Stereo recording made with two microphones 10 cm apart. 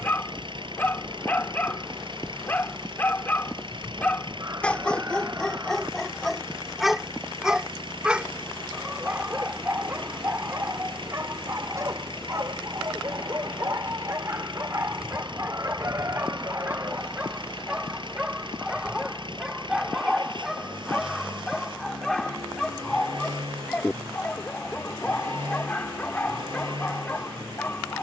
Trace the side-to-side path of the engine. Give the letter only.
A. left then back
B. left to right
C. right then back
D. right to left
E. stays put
E.